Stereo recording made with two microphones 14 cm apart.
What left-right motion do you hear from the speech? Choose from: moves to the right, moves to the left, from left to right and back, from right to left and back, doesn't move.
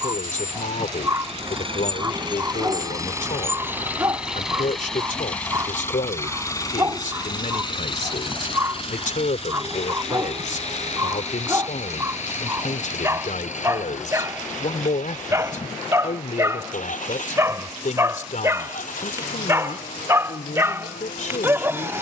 doesn't move.